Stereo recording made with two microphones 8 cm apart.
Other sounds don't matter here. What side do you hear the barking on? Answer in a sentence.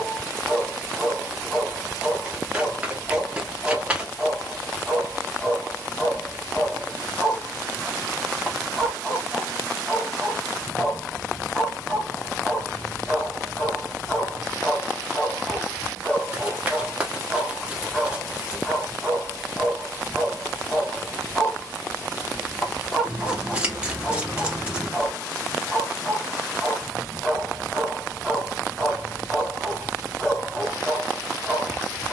In this clip you hear the barking in the centre.